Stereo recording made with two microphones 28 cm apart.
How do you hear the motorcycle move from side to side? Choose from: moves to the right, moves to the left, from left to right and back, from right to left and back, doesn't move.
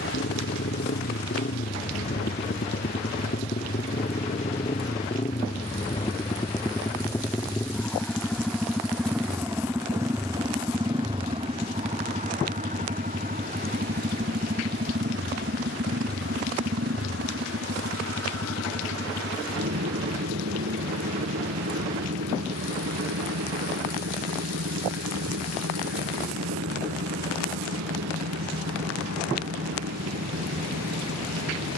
moves to the right.